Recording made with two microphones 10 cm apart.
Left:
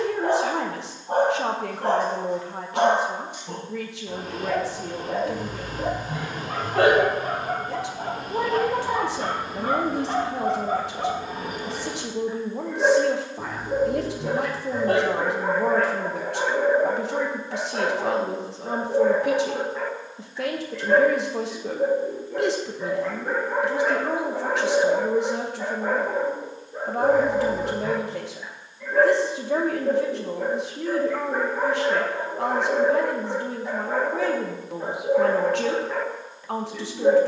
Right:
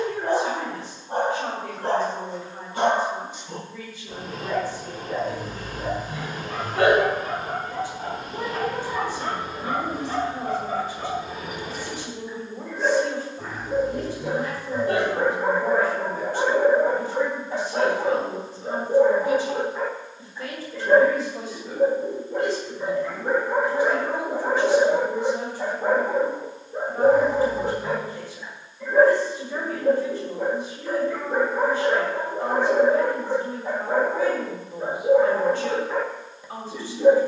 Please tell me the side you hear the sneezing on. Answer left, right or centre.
left.